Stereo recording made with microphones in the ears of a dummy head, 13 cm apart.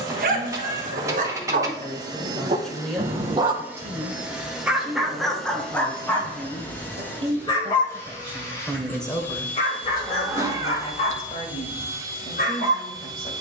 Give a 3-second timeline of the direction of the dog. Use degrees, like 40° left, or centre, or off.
60° right, 10° right, 30° left, 50° left, 50° left.